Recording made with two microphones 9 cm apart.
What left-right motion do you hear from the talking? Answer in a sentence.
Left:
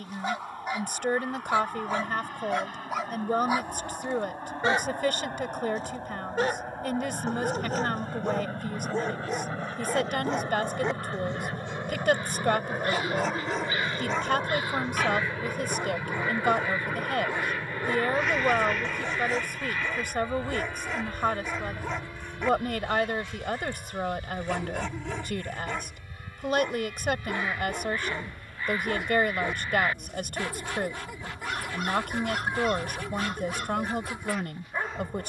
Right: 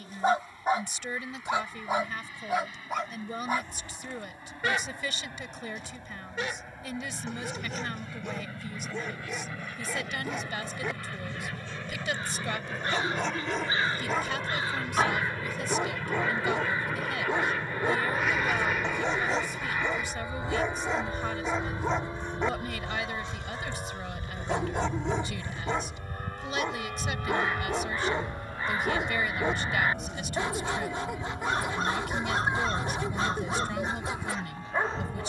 In this clip you hear the talking stay put.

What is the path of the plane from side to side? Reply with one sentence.
You can hear the plane travel towards the right.